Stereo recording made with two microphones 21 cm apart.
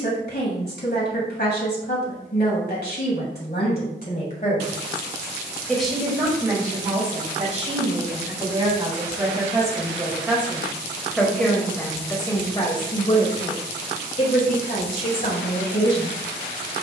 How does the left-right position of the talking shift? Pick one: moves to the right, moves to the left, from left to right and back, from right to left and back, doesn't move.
from left to right and back.